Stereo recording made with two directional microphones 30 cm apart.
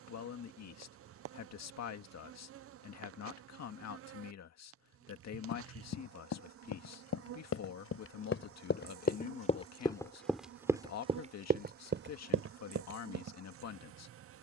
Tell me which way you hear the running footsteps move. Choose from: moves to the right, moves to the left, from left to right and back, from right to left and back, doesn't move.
moves to the right.